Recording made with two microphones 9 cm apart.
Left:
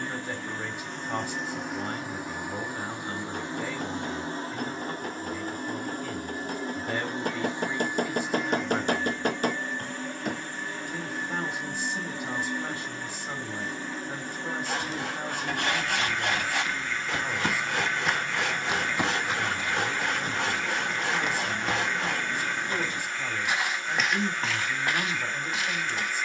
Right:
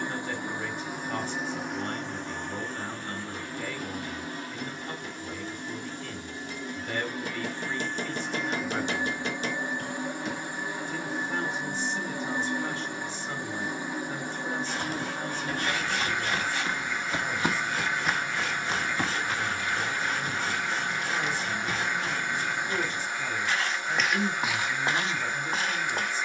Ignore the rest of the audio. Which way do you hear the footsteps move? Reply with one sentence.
You can hear the footsteps go left and come back.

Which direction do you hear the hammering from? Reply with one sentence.
You can hear the hammering on the left.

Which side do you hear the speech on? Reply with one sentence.
In this clip you hear the speech in the centre.